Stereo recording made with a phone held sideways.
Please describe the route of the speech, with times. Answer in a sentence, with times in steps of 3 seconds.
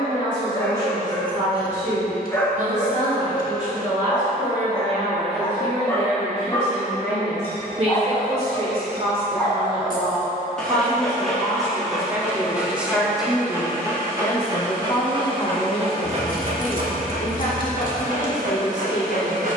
You can hear the speech on the right from 0 s, in the centre from 12 s and on the left from 15 s.